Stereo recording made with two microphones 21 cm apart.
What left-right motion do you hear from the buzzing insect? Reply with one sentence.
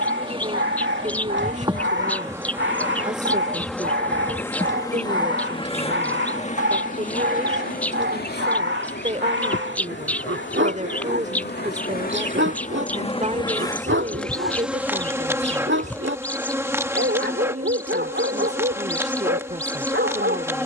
In this clip you hear the buzzing insect go left and come back.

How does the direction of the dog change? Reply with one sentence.
You can hear the dog stay put.